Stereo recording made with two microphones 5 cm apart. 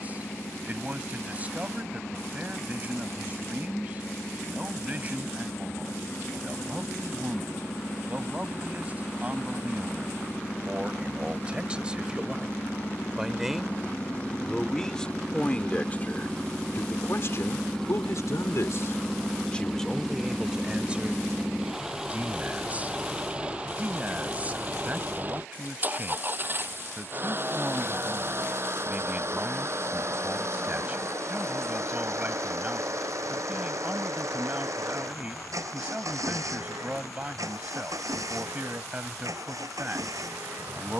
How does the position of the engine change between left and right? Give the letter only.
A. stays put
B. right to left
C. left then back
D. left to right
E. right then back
D.